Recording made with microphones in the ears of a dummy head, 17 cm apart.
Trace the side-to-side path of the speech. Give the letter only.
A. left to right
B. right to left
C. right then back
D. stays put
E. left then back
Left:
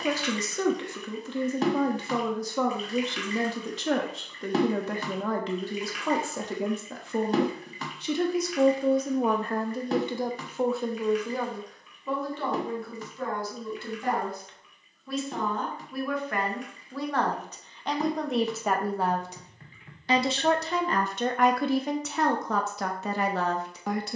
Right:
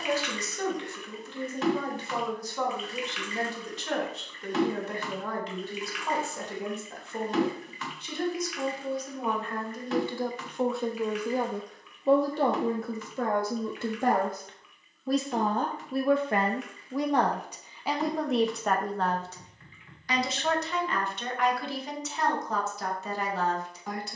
C.